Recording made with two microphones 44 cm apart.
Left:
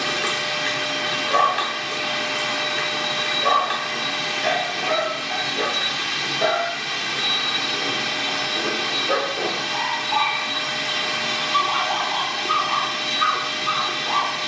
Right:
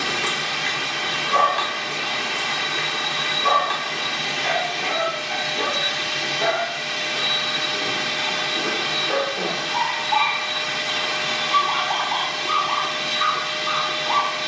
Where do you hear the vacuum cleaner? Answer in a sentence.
In this clip you hear the vacuum cleaner on the left.